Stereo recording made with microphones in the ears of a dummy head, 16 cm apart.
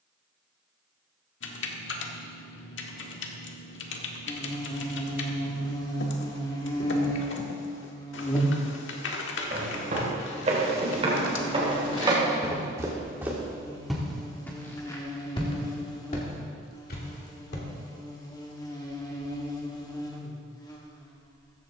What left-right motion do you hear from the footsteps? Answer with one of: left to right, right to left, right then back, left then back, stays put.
right to left.